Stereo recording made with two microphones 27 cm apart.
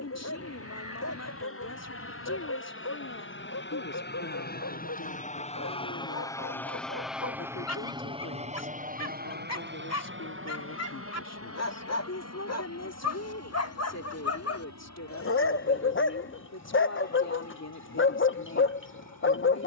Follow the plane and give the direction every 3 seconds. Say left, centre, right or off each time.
left, left, centre, right, right, right, right.